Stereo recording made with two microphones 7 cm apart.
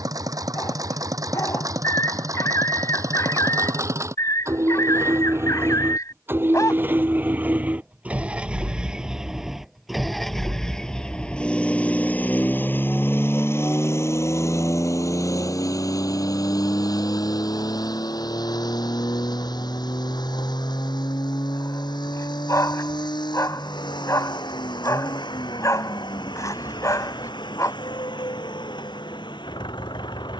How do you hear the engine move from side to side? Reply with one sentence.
You can hear the engine travel towards the left.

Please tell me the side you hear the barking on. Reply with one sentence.
You can hear the barking on the left.